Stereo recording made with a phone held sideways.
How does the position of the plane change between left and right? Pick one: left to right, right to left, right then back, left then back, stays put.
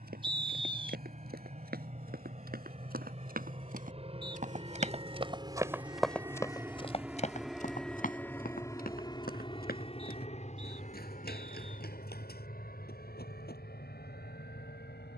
right to left.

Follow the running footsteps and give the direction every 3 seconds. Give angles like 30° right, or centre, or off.
80° right, 50° right, 40° left, 70° left, 80° left.